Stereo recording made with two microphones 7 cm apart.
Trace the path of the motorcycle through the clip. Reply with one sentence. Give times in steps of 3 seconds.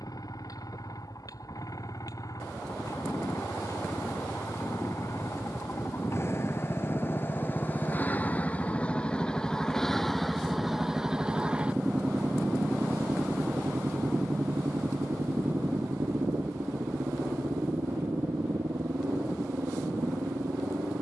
You can hear the motorcycle on the left from 0 s, in the centre from 9 s and on the right from 12 s.